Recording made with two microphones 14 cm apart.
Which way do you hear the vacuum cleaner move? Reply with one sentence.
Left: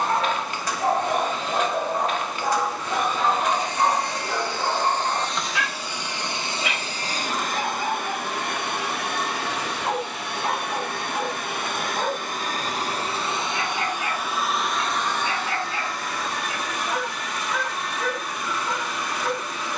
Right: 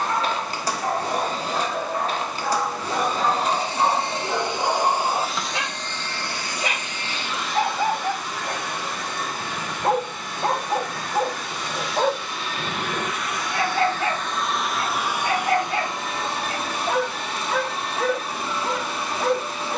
In this clip you hear the vacuum cleaner move from right to left and back again.